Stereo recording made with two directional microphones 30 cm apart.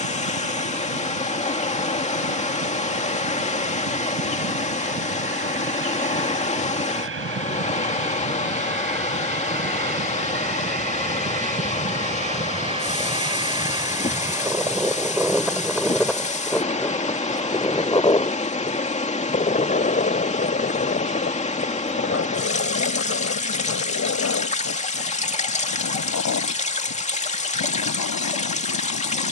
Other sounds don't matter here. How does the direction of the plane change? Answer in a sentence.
In this clip you hear the plane go from the right side to the left.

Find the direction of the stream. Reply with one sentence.
You can hear the stream on the left.